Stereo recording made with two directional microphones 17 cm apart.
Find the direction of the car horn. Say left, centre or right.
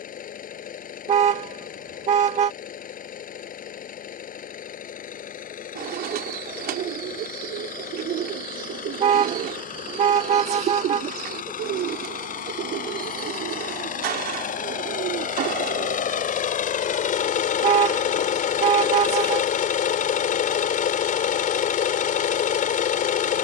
right.